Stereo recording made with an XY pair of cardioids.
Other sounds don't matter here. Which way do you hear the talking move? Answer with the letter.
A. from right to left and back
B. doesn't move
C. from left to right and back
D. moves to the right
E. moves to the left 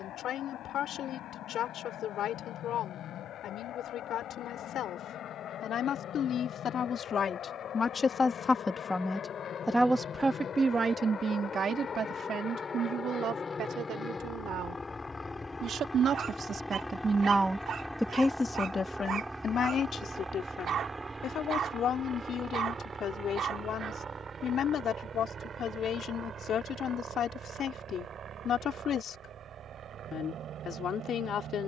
C.